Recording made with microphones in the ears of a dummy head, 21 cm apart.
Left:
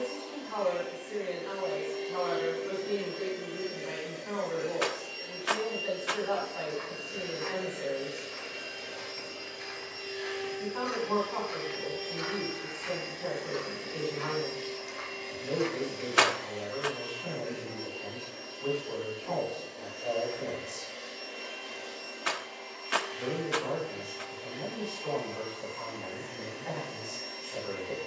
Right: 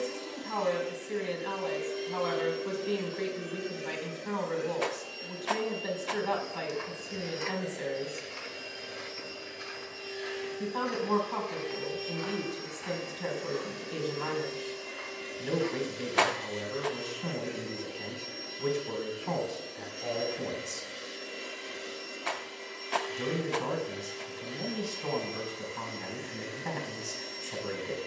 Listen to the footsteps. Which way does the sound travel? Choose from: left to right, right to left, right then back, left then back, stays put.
right to left.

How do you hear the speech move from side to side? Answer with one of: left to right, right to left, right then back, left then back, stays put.
stays put.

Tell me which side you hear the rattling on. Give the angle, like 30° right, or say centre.
20° left.